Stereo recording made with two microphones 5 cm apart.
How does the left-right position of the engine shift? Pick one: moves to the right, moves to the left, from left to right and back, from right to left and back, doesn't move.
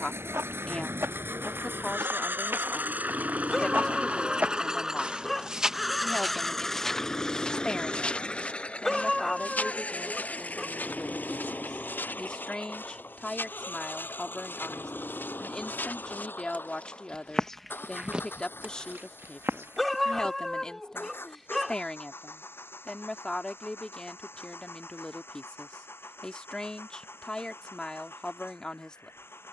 moves to the left.